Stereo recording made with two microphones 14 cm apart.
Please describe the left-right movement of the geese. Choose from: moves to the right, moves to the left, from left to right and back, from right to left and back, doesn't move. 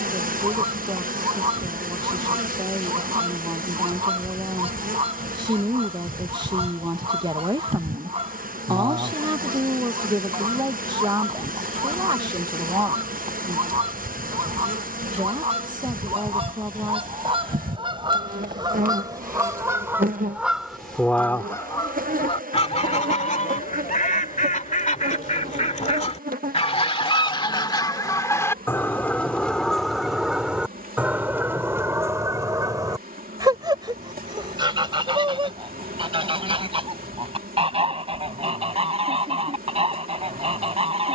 from right to left and back.